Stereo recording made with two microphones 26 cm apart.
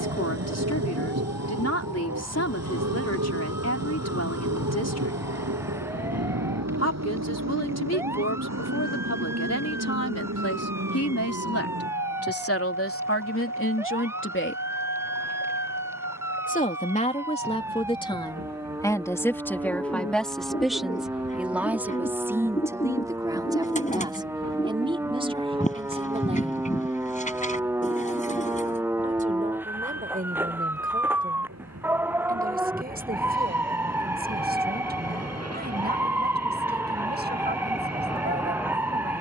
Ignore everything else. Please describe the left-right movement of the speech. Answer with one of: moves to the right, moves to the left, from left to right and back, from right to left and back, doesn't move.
moves to the right.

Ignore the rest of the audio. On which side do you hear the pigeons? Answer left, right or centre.
left.